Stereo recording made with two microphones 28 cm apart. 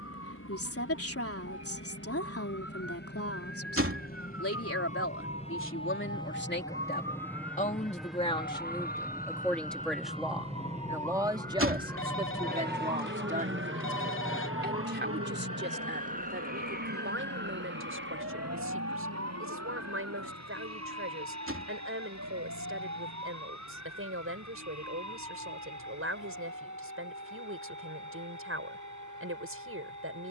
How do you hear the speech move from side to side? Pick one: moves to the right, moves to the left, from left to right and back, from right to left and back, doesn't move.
moves to the right.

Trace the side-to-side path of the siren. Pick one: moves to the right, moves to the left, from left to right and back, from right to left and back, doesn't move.
moves to the right.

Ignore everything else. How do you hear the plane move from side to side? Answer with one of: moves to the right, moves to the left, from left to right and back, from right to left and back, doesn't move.
moves to the right.